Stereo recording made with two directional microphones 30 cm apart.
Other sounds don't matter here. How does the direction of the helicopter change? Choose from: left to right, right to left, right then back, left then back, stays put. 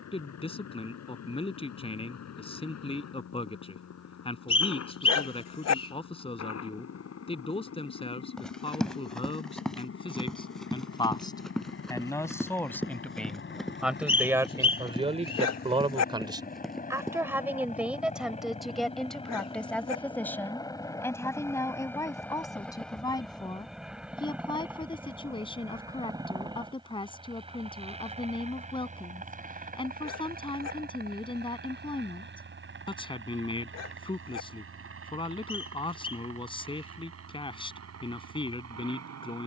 left to right.